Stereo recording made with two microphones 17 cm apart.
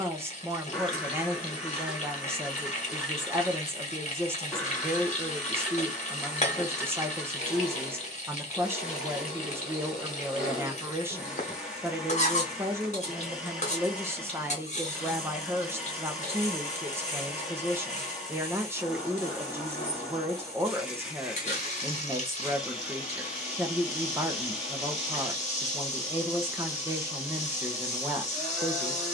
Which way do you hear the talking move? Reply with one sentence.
You can hear the talking stay in one place.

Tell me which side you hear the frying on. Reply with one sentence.
In this clip you hear the frying on the left.